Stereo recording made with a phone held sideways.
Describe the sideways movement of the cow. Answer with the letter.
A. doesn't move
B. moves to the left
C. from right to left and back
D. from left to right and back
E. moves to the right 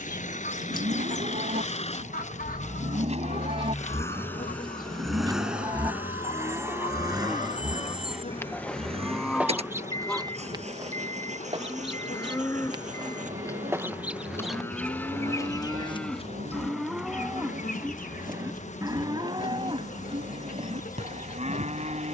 C.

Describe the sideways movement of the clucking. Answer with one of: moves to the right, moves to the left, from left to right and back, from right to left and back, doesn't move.
from left to right and back.